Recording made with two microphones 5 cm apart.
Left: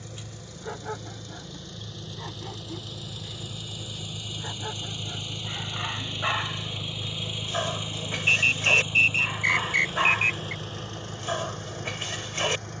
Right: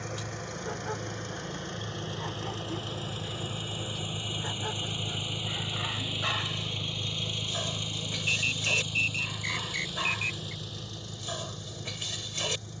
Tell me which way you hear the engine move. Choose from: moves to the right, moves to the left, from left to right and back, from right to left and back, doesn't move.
moves to the left.